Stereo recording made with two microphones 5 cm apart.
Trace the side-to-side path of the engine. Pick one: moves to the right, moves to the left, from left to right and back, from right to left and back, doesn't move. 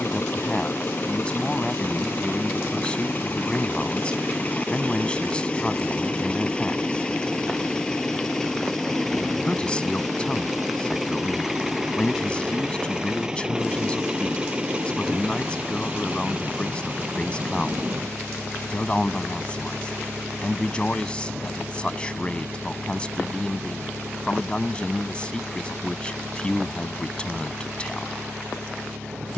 moves to the right.